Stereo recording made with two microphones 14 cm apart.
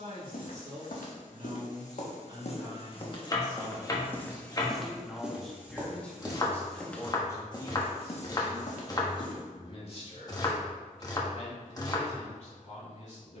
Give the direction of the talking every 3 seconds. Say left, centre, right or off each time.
right, centre, left, left, left.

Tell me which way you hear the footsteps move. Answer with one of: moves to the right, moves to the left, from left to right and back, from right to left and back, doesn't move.
from left to right and back.